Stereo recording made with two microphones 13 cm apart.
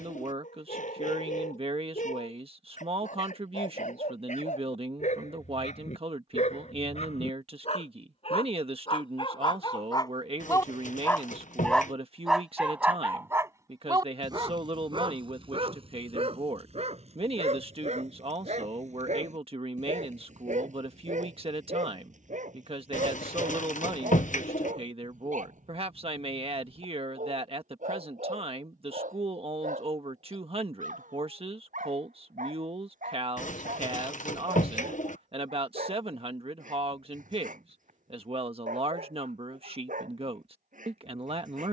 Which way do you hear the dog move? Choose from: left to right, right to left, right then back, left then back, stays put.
left to right.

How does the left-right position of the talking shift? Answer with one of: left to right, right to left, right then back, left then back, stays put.
stays put.